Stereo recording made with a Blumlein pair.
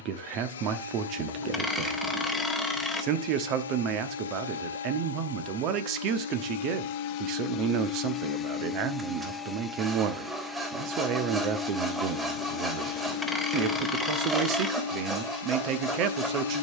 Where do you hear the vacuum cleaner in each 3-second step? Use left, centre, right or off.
left, left, left, centre, left, left.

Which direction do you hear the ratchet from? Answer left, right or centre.
centre.